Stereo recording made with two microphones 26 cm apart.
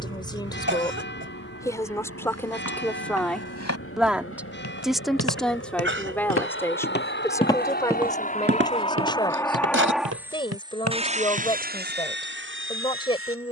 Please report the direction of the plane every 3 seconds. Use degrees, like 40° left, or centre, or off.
70° left, 60° left, 40° left, 10° right, 50° right.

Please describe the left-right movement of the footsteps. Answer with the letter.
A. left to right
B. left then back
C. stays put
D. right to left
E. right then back
A.